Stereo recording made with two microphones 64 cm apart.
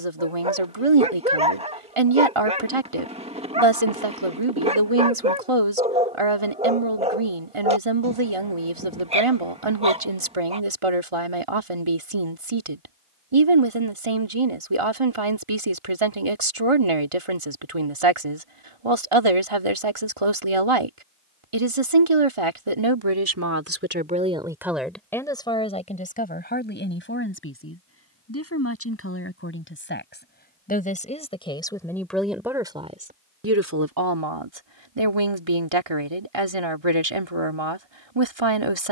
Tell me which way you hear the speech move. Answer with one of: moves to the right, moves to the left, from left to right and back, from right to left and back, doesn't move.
from right to left and back.